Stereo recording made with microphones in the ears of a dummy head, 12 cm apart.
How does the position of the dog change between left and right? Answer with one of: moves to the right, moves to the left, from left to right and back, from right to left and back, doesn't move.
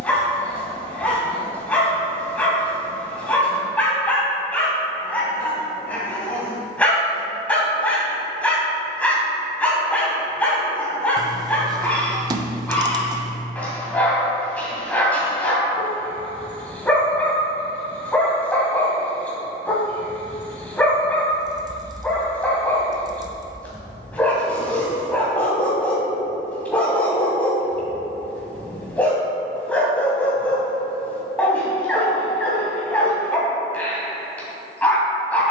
doesn't move.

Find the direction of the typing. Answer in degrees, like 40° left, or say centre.
30° right.